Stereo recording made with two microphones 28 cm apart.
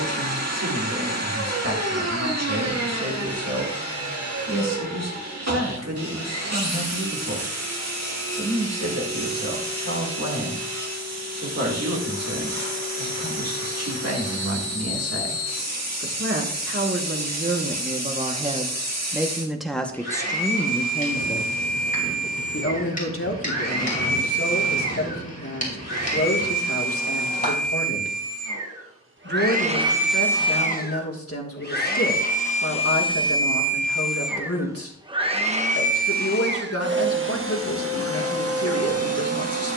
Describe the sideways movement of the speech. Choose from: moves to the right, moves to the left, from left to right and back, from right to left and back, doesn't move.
moves to the left.